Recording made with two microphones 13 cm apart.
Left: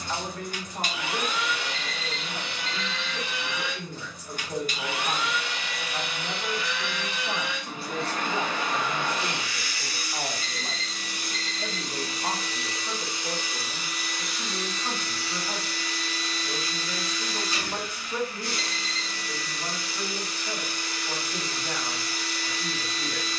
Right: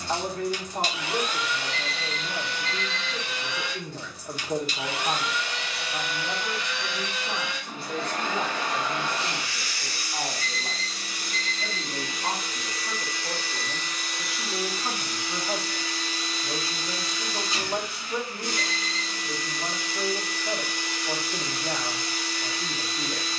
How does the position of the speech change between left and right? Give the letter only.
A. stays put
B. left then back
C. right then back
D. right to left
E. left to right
B.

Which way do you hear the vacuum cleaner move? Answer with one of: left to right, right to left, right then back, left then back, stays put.
left to right.